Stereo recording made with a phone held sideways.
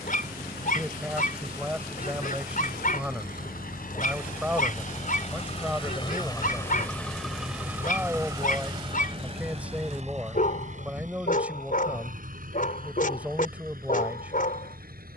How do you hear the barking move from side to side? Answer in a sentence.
You can hear the barking stay put.